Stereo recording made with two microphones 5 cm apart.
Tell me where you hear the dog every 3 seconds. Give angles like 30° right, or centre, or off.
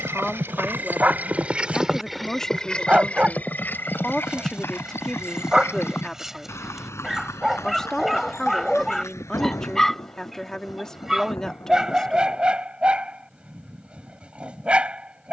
30° right, 20° right, centre, centre, 20° right.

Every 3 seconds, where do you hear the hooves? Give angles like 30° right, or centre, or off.
20° right, 40° left, 60° left, 70° left, off.